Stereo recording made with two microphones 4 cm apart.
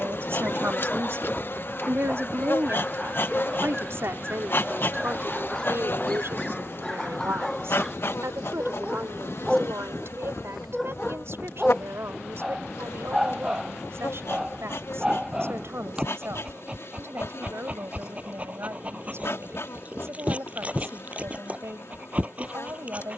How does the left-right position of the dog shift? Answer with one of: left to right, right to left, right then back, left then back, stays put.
left to right.